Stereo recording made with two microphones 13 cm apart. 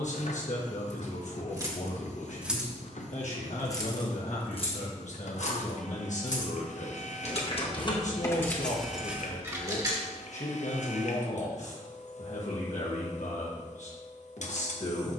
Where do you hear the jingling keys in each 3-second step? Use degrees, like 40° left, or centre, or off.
20° right, 40° left, 30° left, 20° right, off.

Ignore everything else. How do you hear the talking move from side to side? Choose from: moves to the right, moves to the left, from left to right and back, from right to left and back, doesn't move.
doesn't move.